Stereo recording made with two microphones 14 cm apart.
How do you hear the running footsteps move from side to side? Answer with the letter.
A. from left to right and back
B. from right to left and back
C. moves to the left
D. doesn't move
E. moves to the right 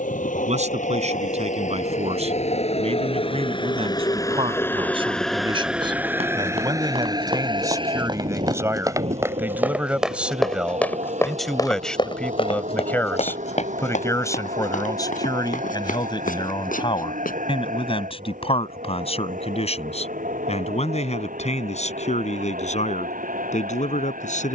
C.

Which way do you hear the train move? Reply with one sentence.
In this clip you hear the train move to the right.